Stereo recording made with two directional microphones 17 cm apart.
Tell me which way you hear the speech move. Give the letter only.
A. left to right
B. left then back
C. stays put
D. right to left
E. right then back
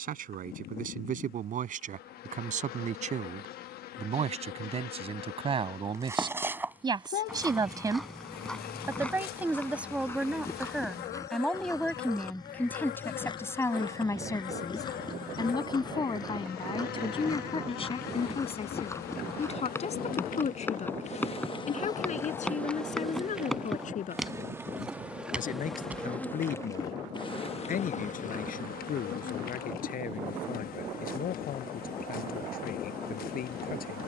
D.